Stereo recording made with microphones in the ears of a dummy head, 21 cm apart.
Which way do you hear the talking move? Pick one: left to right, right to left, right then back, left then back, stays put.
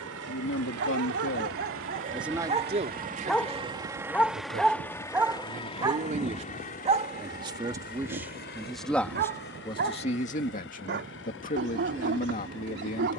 right then back.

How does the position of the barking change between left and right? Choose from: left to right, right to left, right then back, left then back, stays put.
left then back.